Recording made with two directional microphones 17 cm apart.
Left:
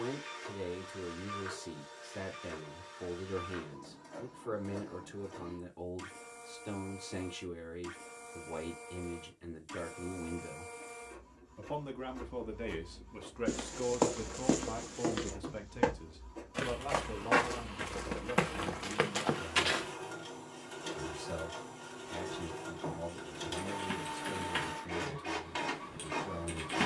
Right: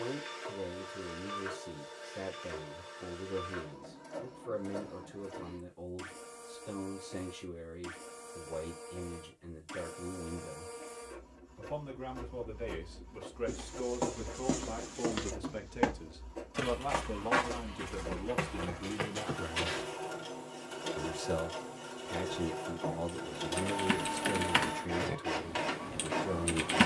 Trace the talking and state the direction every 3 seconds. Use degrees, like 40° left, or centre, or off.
40° left, 40° left, 40° left, 40° left, 20° left, 20° right, 50° right, 50° right, 50° right.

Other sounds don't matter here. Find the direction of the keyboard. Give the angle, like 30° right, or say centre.
50° right.